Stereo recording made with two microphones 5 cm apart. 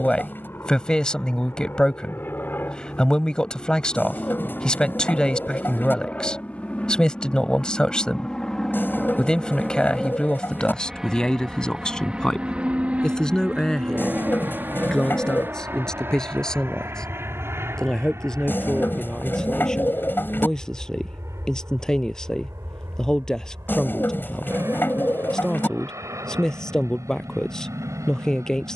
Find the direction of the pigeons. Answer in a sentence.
You can hear the pigeons on the left.